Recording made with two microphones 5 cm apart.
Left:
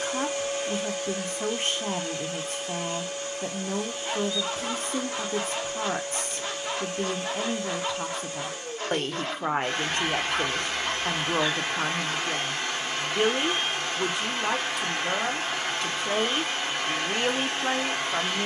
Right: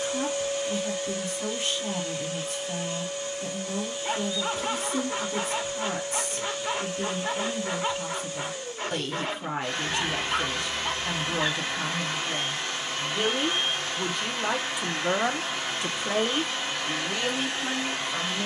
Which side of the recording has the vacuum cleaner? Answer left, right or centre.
left.